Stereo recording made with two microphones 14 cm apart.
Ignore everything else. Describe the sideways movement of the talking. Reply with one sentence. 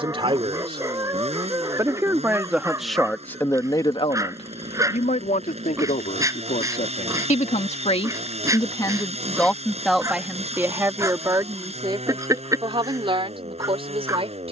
In this clip you hear the talking go left and come back.